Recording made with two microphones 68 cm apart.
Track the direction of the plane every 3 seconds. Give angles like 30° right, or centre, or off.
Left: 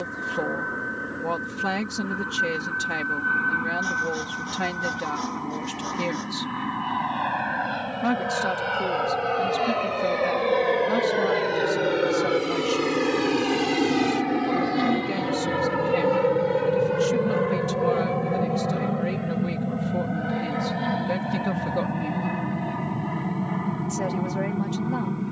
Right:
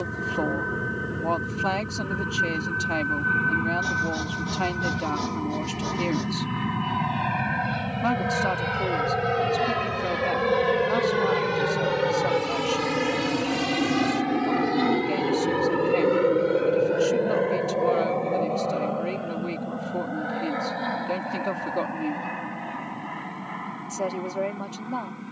80° right, 70° right, 70° right, 50° right, 10° right, 30° left, 50° left, 60° left, 60° left.